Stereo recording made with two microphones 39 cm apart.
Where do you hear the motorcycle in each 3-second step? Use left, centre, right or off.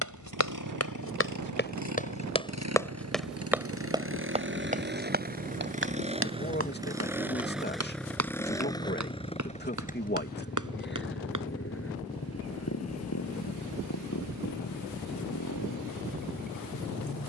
right, right, centre, left, left, left.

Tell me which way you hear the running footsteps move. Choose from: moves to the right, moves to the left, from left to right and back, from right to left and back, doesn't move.
moves to the right.